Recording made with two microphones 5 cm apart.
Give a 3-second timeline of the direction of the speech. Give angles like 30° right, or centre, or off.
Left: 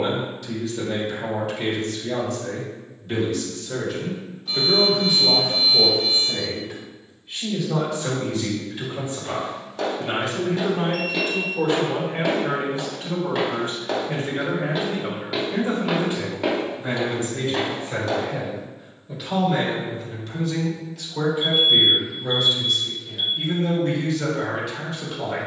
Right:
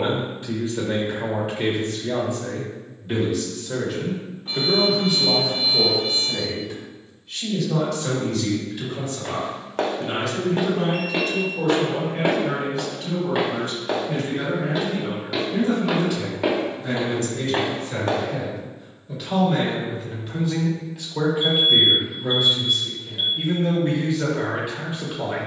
20° right, centre, 10° left, 30° left, 30° left, 30° left, centre, 20° right, 20° right.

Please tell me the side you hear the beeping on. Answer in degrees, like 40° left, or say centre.
30° right.